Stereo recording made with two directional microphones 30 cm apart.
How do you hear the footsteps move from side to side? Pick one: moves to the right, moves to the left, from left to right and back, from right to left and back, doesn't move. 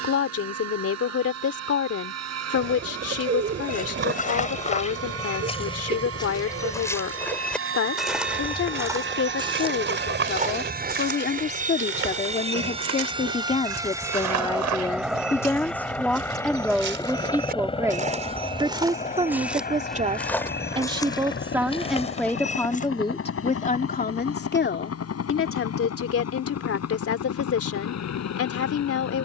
from left to right and back.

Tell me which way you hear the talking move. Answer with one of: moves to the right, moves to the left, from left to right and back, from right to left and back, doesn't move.
from left to right and back.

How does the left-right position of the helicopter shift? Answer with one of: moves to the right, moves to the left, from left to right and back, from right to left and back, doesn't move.
moves to the left.